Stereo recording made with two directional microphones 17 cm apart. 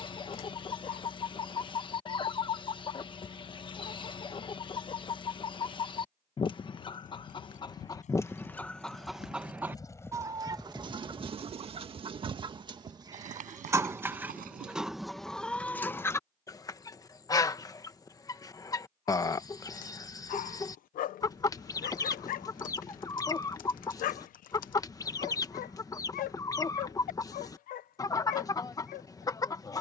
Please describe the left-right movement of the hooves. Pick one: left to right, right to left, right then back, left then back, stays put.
left to right.